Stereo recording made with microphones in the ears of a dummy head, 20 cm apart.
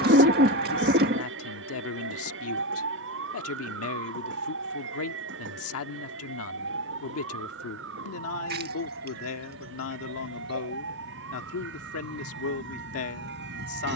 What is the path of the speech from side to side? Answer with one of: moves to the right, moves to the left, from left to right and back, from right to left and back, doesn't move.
doesn't move.